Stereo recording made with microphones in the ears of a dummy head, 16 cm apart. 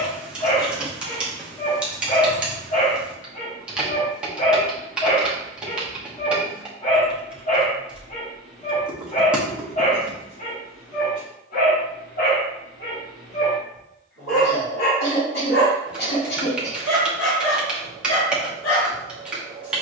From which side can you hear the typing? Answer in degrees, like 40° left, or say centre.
10° right.